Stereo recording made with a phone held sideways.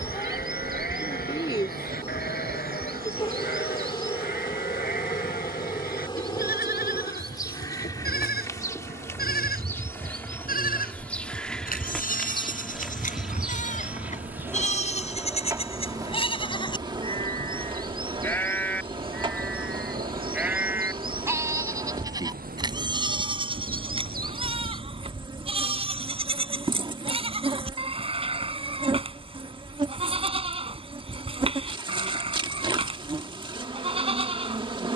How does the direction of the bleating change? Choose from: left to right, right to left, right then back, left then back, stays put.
left to right.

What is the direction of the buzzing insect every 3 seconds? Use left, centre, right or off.
left, left, left, centre, centre, right, right, right, right, right, right, right.